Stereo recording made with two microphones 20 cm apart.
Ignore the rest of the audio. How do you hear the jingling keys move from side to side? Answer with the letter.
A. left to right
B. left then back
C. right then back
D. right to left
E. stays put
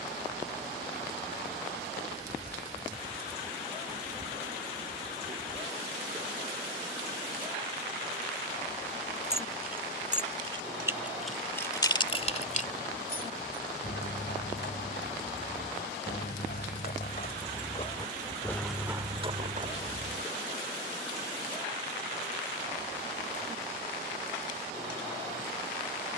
B.